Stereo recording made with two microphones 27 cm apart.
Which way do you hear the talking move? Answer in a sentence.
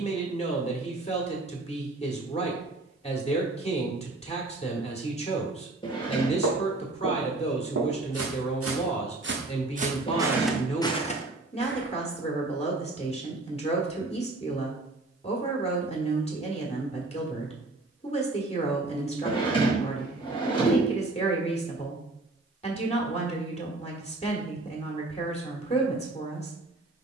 You can hear the talking stay in one place.